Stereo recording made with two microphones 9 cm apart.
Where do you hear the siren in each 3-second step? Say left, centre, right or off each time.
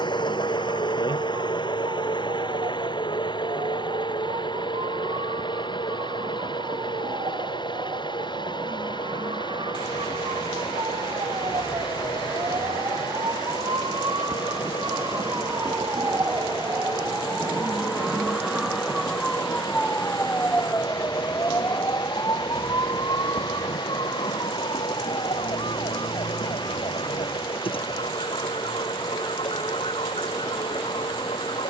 right, right, right, right, right, right, centre, left, left, left, left.